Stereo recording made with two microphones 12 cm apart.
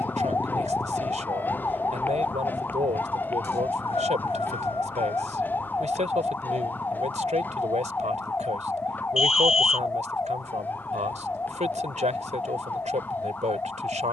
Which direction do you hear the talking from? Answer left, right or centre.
right.